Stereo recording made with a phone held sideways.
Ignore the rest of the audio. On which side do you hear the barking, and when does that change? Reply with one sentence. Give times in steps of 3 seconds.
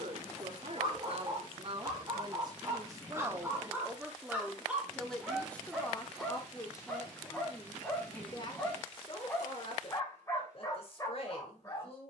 In this clip you hear the barking on the right from 0 s, in the centre from 3 s and on the left from 9 s.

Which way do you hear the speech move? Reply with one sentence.
In this clip you hear the speech go from the right side to the left.